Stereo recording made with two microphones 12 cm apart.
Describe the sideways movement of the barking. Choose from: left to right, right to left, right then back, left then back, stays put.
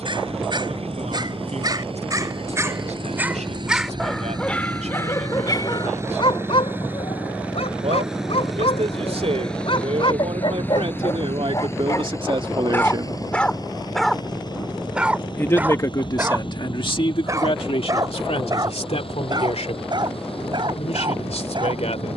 left then back.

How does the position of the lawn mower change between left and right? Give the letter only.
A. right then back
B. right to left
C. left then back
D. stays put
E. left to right
B.